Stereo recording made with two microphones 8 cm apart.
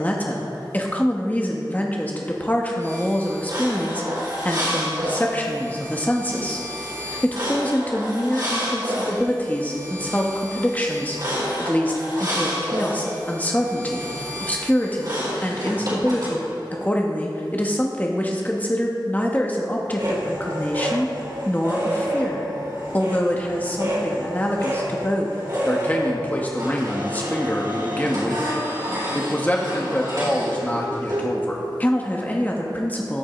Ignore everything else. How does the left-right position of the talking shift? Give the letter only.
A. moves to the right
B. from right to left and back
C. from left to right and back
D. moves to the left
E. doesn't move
E.